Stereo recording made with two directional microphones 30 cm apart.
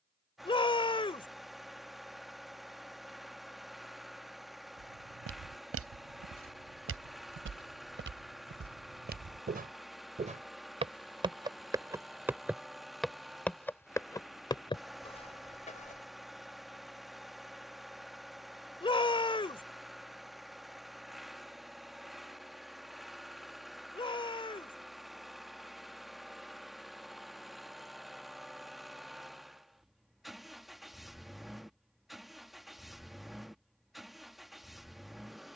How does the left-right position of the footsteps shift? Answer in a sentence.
In this clip you hear the footsteps go from the right side to the left.